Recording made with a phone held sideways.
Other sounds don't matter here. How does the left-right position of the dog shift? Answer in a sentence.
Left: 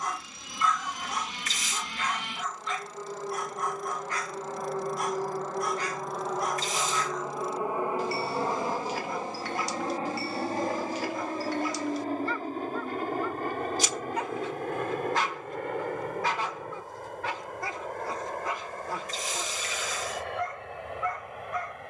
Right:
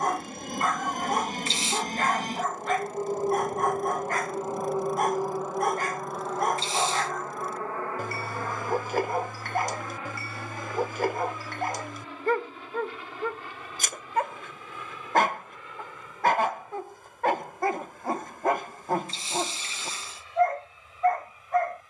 In this clip you hear the dog stay in one place.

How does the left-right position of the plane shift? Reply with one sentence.
In this clip you hear the plane move from right to left.